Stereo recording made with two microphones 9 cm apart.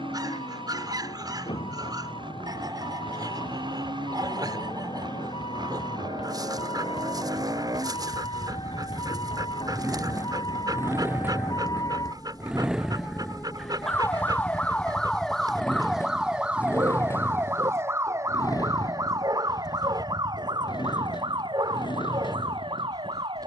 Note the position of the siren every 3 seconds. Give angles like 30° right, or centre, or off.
80° left, 70° left, 60° left, 50° left, 30° left, 10° right, 40° right, 60° right.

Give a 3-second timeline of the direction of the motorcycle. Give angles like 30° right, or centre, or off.
60° right, 60° right, 40° right, 30° right, centre, 30° left, 50° left, 60° left.